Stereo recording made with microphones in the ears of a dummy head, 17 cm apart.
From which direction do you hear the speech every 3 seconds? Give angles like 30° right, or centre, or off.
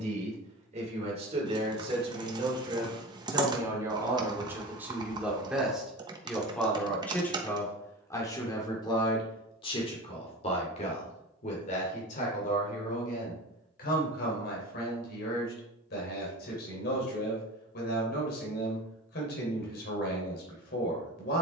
30° right, 10° right, 10° left, 30° left, 50° left, 60° left, 60° left.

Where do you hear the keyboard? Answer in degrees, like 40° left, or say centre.
20° right.